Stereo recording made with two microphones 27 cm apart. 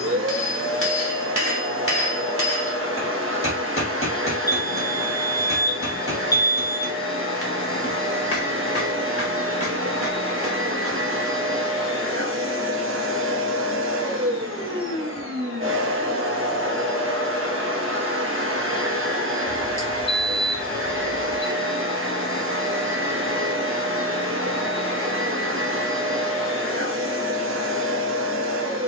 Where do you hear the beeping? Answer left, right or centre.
left.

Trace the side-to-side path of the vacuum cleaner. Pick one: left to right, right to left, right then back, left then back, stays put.
stays put.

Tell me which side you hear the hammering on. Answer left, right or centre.
left.